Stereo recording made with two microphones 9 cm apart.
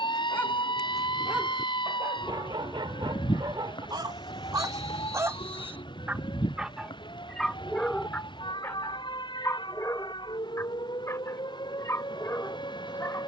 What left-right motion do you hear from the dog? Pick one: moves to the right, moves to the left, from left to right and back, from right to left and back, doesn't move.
from left to right and back.